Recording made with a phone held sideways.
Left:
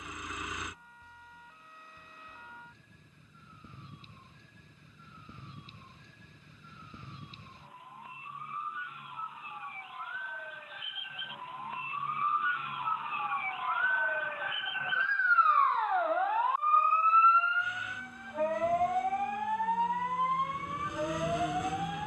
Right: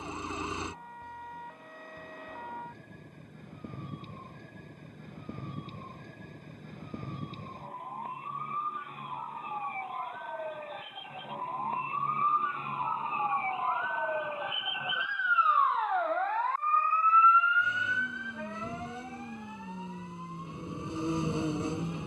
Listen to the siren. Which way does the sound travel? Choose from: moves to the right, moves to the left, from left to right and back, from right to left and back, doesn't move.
moves to the left.